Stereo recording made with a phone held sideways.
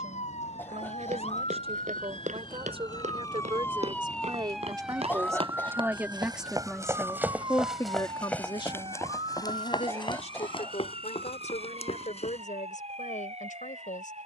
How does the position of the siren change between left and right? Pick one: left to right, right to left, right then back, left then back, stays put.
left to right.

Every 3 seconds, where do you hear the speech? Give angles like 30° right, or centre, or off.
50° right, 30° right, 20° left, 60° left, 80° left.